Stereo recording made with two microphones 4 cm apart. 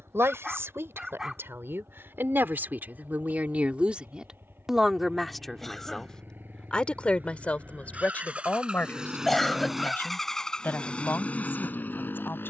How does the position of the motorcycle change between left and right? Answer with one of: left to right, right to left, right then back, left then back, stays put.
right to left.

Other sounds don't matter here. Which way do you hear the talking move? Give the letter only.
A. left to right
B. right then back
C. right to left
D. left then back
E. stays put
C.